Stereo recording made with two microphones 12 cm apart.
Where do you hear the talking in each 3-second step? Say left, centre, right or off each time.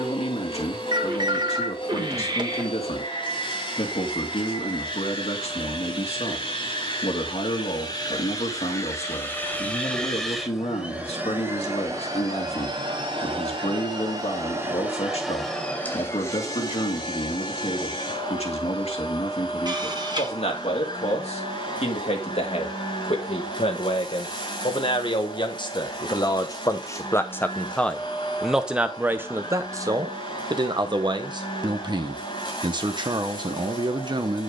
left, left, left, left, left, left, left, left, left, centre, right, right.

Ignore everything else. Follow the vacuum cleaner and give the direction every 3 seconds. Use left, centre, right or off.
left, left, left, centre, right, left, left, left, left, left, left, left.